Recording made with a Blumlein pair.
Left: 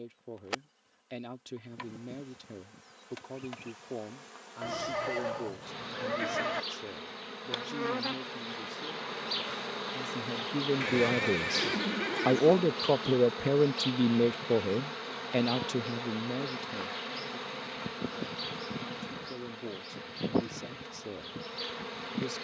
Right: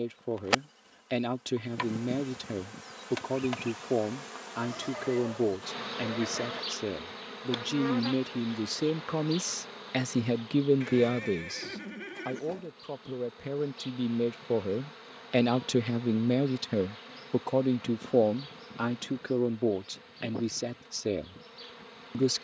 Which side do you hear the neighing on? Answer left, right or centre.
left.